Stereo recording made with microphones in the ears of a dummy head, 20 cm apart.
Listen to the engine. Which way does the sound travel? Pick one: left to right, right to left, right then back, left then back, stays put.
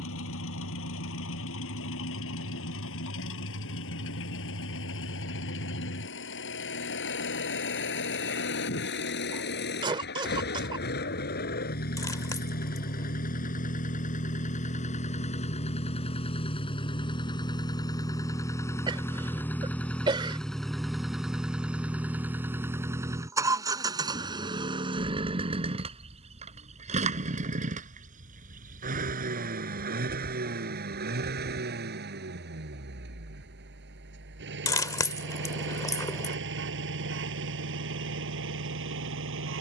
left to right.